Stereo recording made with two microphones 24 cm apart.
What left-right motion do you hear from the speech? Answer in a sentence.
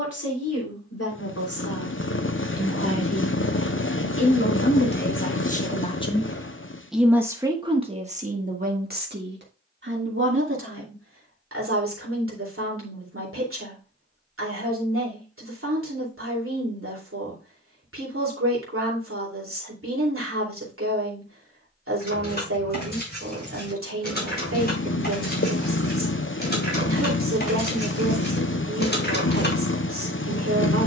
You can hear the speech move from left to right.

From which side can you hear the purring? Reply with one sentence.
In this clip you hear the purring on the left.